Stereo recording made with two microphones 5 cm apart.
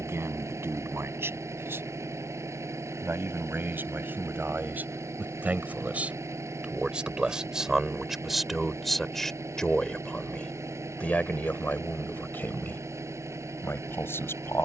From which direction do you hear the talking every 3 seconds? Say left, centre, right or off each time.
right, right, centre, left, left.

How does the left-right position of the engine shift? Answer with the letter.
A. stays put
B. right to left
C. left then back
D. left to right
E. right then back
A.